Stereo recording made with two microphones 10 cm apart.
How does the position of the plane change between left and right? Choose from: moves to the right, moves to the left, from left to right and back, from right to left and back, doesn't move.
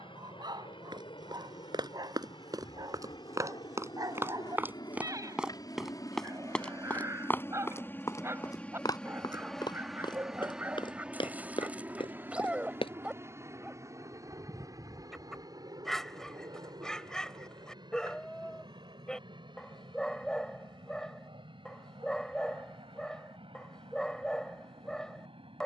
moves to the right.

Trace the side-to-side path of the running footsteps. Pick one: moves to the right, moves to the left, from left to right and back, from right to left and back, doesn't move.
moves to the left.